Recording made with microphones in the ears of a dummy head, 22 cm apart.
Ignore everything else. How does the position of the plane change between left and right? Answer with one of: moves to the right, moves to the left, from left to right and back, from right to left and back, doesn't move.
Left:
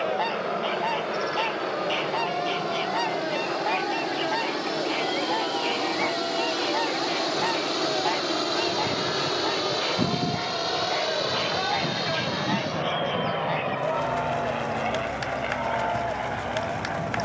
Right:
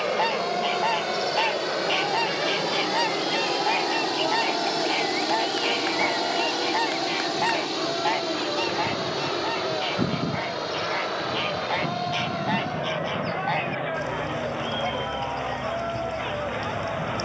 moves to the left.